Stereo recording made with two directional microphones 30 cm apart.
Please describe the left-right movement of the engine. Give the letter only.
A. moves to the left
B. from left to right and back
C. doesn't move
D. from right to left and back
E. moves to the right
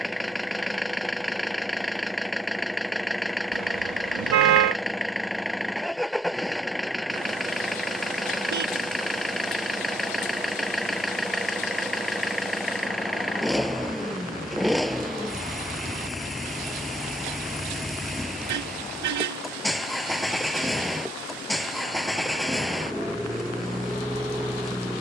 C.